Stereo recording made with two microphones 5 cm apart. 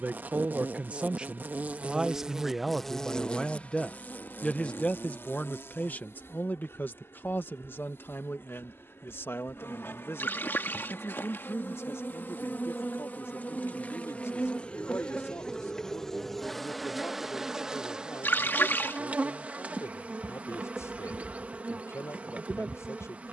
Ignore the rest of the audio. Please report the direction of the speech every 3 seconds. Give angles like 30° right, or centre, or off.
20° right, 20° left, 50° left, 60° left, 70° left, 70° left, 80° left, 80° left.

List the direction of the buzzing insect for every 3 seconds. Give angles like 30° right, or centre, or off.
30° right, 40° left, 60° left, 50° left, 30° left, centre, 30° right, 30° right.